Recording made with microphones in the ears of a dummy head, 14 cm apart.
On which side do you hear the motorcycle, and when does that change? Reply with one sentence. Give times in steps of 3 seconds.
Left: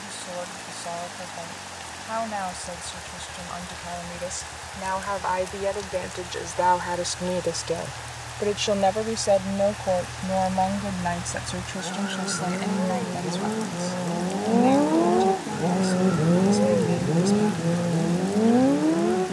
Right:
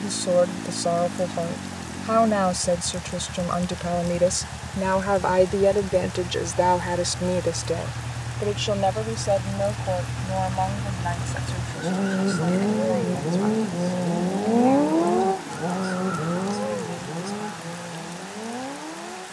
In this clip you hear the motorcycle on the right from 0 s and on the left from 15 s.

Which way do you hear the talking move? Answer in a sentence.
In this clip you hear the talking travel towards the left.